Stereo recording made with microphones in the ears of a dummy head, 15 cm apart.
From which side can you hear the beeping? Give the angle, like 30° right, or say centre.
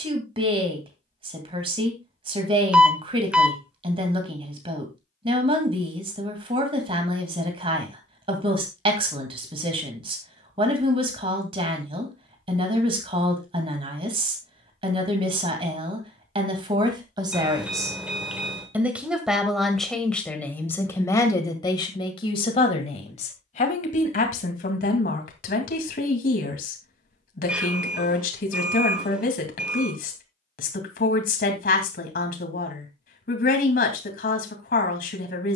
10° right.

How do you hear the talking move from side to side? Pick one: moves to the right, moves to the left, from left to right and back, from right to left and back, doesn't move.
moves to the left.